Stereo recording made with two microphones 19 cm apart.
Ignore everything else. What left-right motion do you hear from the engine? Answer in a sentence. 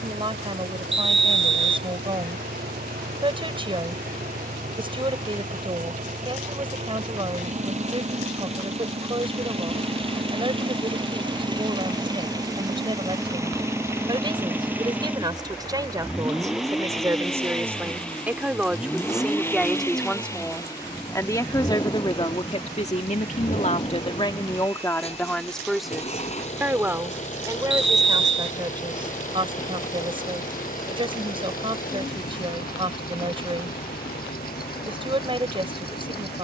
In this clip you hear the engine travel towards the left.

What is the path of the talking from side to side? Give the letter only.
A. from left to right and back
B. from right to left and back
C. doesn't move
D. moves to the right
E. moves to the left
B.